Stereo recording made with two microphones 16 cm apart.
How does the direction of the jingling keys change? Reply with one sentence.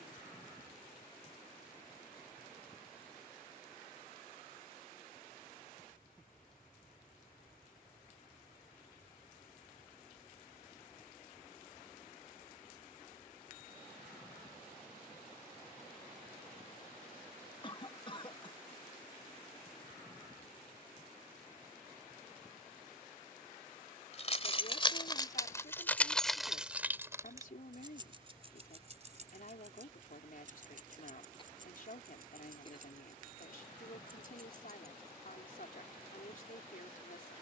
In this clip you hear the jingling keys go from the left side to the right.